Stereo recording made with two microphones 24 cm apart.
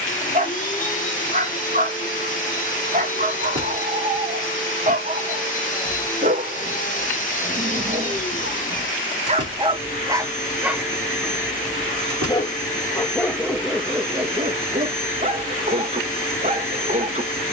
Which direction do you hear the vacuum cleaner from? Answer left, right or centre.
left.